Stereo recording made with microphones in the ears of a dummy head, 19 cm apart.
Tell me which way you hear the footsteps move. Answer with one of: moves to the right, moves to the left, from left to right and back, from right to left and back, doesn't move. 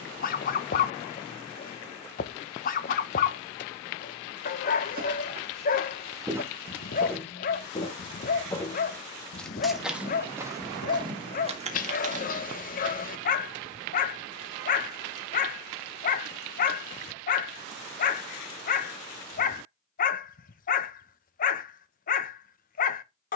from right to left and back.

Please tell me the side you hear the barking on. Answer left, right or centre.
left.